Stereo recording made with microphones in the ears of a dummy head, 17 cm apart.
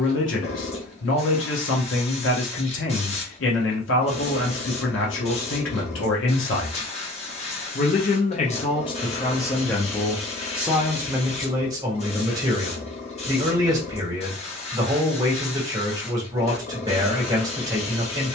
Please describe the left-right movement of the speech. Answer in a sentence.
You can hear the speech move from left to right.